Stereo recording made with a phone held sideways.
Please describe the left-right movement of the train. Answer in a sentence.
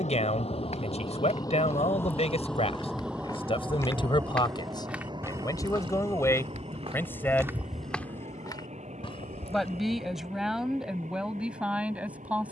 You can hear the train move to the right.